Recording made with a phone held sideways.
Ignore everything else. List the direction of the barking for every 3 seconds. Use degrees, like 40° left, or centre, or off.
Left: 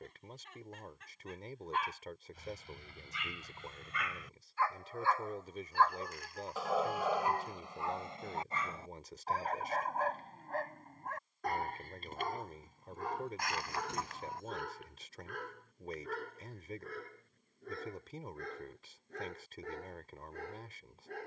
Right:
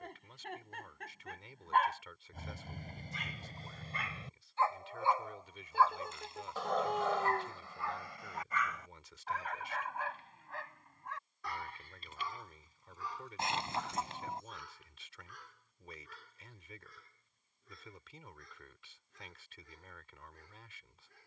50° right, 30° right, 20° left, 40° left, 60° left, 60° left, 70° left.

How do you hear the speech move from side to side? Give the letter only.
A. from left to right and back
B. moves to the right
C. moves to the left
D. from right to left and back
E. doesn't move
E.